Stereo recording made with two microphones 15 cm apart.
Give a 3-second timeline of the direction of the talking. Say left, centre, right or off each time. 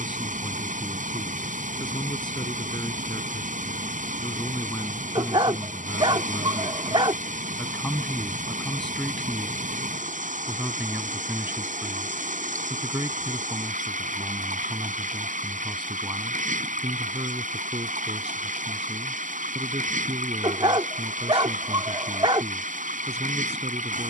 left, left, centre, centre, right, right, right, right.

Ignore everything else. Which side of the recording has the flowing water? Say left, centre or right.
right.